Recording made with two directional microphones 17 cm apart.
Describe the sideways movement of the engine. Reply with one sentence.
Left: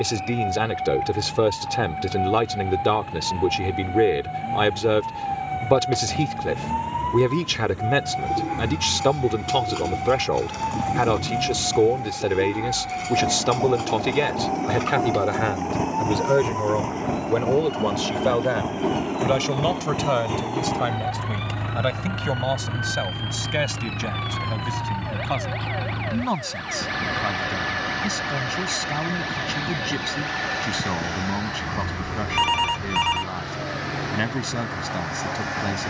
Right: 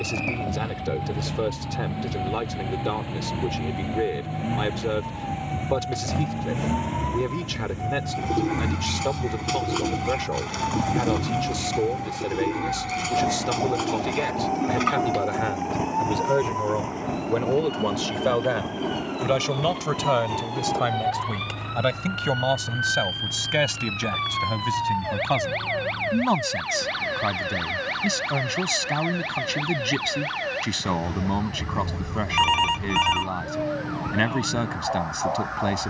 You can hear the engine go from the right side to the left.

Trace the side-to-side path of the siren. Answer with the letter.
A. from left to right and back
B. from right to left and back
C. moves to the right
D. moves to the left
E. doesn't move
C.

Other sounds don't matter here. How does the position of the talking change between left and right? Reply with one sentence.
In this clip you hear the talking travel towards the right.